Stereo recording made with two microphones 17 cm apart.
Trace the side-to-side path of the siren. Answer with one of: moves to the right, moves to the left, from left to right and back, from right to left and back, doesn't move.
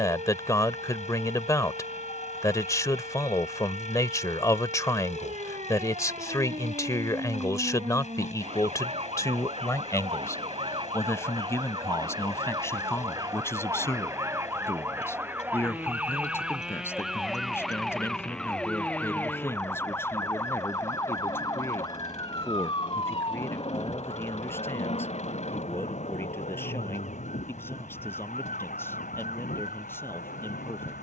moves to the left.